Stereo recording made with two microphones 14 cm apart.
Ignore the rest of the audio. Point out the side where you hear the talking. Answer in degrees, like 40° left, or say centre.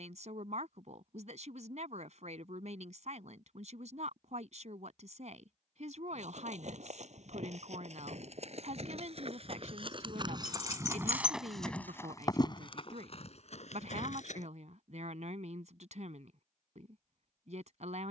60° right.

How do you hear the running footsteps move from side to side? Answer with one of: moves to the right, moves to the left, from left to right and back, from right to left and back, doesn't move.
moves to the left.